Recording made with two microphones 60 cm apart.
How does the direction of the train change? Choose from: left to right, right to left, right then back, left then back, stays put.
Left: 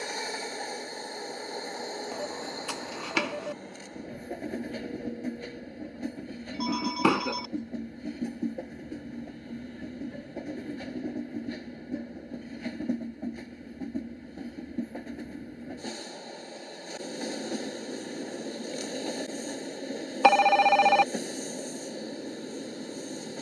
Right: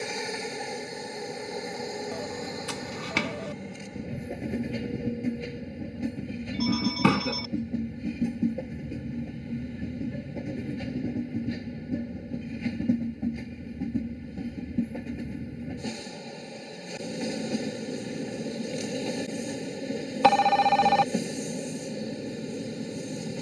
stays put.